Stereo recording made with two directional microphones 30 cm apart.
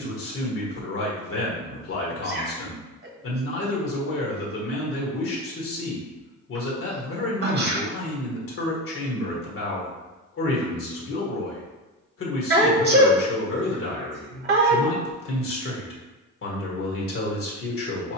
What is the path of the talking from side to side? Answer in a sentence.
You can hear the talking stay put.